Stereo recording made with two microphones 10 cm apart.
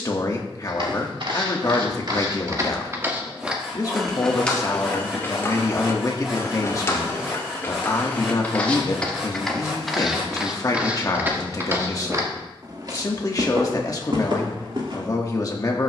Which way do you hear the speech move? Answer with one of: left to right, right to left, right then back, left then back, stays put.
stays put.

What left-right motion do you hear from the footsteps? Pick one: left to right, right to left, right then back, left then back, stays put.
left then back.